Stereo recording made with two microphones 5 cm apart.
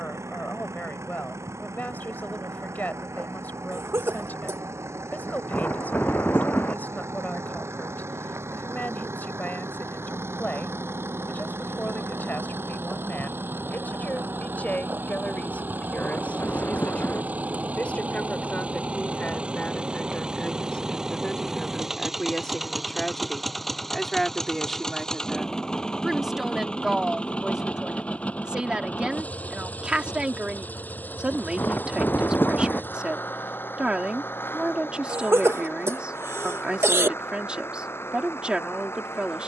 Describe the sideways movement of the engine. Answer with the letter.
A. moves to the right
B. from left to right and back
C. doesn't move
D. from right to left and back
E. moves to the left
E.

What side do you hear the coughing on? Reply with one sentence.
In this clip you hear the coughing on the right.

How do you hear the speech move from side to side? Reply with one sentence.
In this clip you hear the speech travel towards the right.